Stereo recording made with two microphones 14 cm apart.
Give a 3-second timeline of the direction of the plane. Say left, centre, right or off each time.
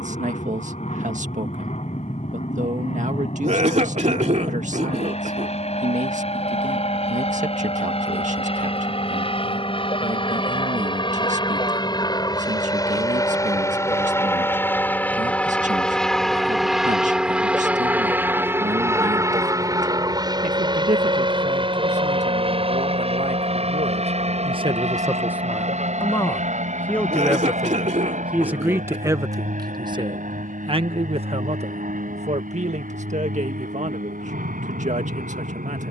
left, left, left, left, left, centre, right, right, right, right, right, right.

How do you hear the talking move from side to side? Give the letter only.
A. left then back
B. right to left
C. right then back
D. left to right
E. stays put
A.